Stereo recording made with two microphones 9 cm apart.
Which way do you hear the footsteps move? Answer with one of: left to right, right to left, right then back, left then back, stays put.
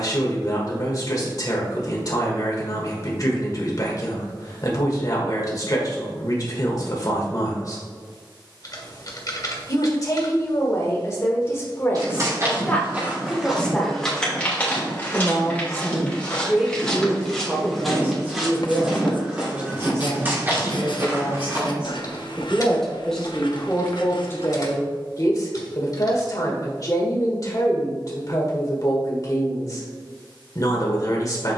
left then back.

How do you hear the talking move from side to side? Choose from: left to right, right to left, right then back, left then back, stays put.
right then back.